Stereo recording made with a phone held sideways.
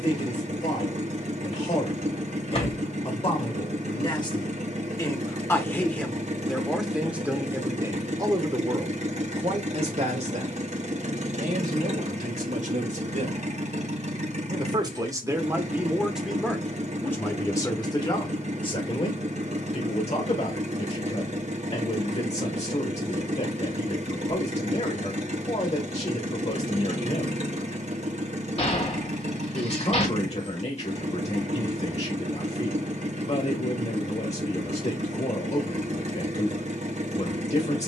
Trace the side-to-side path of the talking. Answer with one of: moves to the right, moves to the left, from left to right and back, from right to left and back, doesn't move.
from left to right and back.